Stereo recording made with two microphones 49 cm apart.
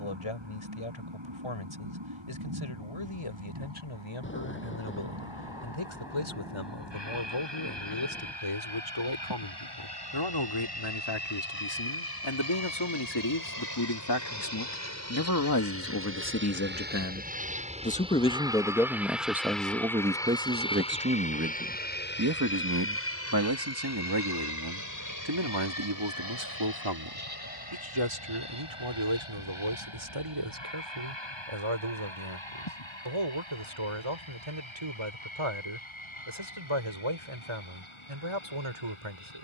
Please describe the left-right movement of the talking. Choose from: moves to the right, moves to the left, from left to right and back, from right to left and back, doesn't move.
moves to the right.